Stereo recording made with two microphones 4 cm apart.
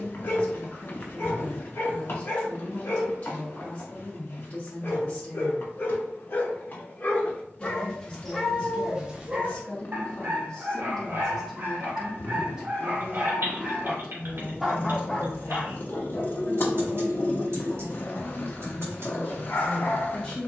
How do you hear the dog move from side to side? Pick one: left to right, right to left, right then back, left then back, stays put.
right then back.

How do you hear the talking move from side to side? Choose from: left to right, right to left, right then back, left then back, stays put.
right then back.